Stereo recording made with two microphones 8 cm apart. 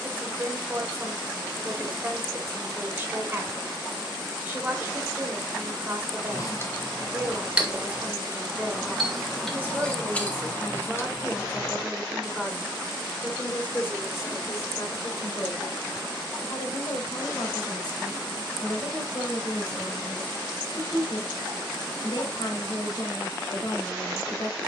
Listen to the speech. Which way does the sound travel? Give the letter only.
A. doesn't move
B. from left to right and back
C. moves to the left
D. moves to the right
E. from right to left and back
C.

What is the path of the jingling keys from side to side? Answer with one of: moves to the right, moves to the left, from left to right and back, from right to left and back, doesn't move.
from left to right and back.